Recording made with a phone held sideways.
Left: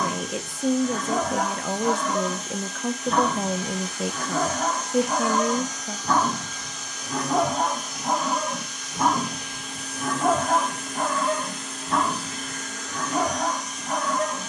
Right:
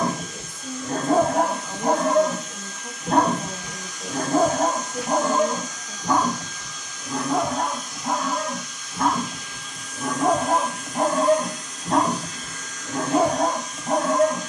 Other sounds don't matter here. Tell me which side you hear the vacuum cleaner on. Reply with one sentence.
You can hear the vacuum cleaner on the left.